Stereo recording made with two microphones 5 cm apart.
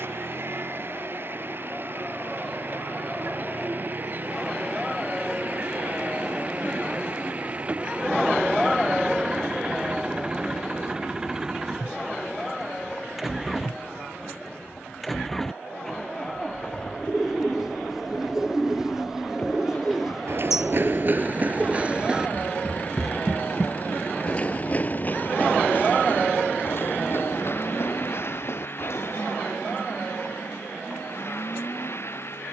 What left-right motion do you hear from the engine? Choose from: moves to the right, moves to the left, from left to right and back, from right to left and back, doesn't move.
moves to the left.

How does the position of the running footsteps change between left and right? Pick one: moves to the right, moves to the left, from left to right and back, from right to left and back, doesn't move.
moves to the left.